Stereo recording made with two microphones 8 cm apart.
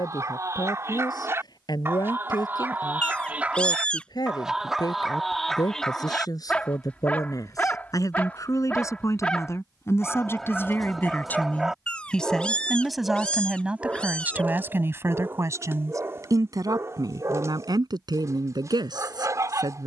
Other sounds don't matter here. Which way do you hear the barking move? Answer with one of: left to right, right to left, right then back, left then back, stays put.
left then back.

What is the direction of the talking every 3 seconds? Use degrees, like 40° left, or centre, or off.
60° left, 60° left, 50° left, 30° left, 10° right, 50° right, 70° right.